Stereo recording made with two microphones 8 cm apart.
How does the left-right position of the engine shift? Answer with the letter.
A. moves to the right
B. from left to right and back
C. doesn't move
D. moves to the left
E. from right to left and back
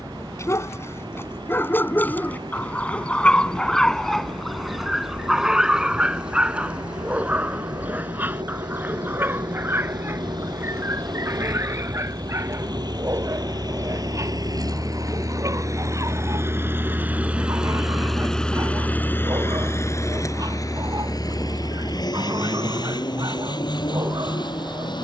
D.